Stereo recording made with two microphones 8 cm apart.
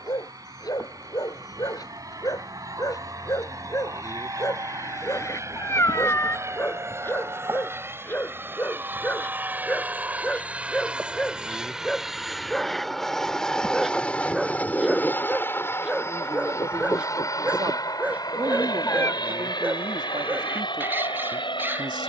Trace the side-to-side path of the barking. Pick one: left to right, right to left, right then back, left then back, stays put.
left to right.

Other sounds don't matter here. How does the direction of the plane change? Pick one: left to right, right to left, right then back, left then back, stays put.
right to left.